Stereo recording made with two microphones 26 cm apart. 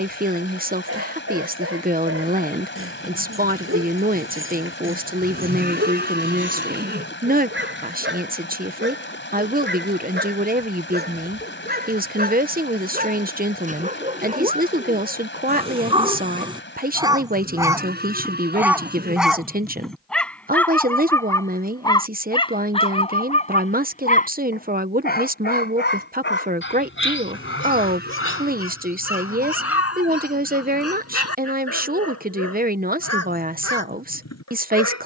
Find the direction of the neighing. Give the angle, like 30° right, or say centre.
40° right.